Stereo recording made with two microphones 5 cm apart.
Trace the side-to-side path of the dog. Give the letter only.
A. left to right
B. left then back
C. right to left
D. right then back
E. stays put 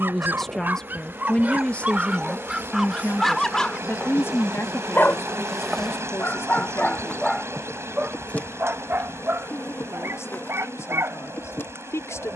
B.